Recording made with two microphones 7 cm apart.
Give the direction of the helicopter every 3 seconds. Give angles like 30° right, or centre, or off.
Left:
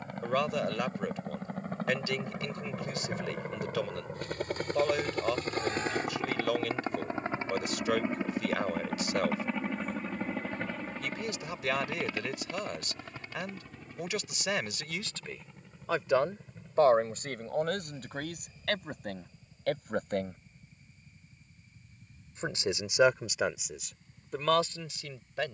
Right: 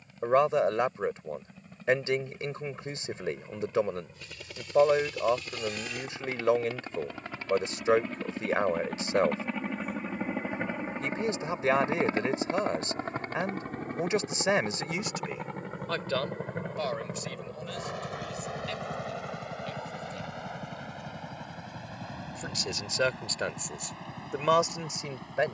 60° left, 50° left, 30° left, 10° right, 40° right, 60° right, 70° right, 70° right, 80° right.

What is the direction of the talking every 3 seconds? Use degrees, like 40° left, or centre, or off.
30° right, 30° right, 30° right, 30° right, 30° right, 30° left, 60° left, 10° left, 20° right.